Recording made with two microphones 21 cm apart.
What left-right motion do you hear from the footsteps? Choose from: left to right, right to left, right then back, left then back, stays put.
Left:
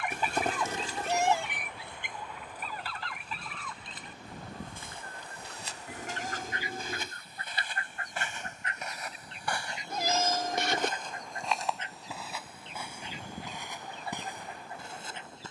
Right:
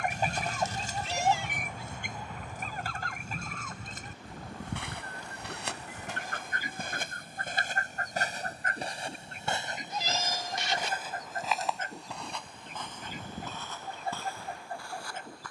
right to left.